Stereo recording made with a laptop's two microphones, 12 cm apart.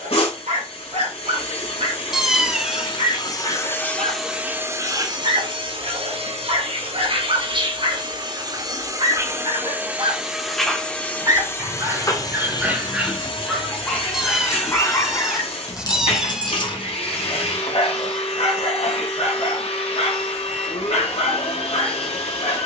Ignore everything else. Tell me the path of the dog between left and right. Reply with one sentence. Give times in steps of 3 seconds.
You can hear the dog on the right from 0 s, in the centre from 12 s and on the left from 15 s.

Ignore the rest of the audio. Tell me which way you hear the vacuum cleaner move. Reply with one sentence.
You can hear the vacuum cleaner move from left to right and back again.